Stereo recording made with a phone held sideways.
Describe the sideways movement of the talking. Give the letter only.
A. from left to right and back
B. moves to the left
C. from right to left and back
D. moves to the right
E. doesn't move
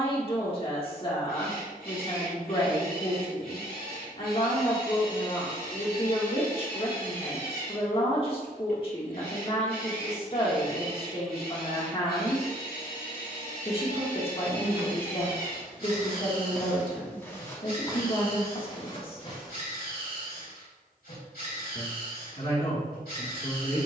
E.